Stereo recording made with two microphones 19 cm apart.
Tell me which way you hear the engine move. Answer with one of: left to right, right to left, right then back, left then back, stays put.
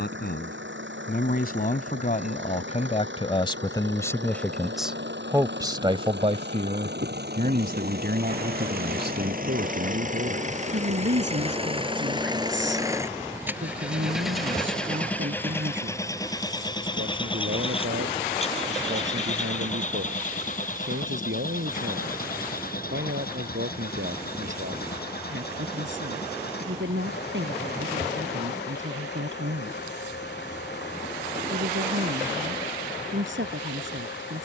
right to left.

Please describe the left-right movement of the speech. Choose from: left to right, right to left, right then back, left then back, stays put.
left to right.